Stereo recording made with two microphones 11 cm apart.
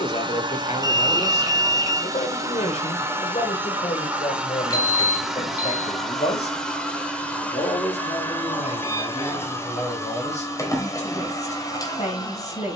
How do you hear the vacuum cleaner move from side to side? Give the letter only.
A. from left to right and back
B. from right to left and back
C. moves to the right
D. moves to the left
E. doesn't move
D.